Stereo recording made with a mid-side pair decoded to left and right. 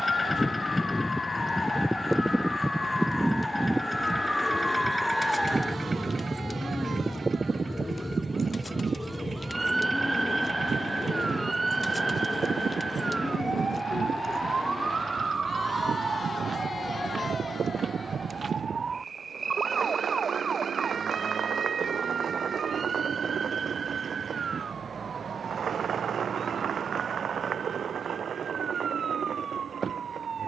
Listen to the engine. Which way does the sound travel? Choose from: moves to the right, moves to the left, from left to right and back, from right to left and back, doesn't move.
moves to the right.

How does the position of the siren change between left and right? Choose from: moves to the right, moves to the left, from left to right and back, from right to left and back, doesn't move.
moves to the right.